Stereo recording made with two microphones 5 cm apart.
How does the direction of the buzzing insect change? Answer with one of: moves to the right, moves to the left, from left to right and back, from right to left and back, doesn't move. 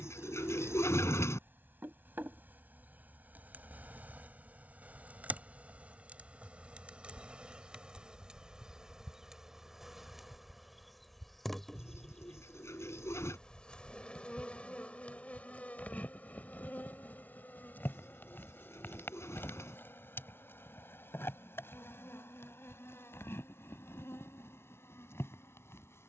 moves to the left.